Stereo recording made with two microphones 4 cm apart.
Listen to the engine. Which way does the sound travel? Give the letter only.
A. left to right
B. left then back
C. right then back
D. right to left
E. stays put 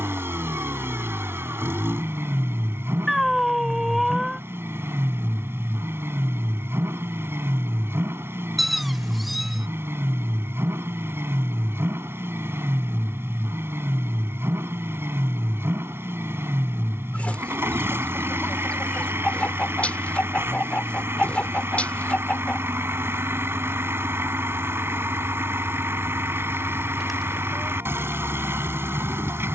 E.